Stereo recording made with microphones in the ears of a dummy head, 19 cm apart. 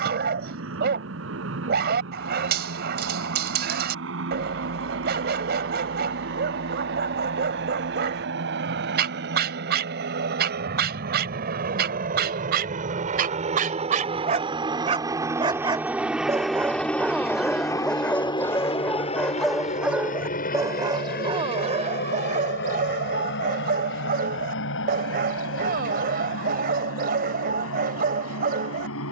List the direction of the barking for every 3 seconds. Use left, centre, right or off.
right, right, right, right, right, centre, centre, right, right, right.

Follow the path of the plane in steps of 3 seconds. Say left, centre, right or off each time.
right, right, right, right, right, centre, left, left, left, left.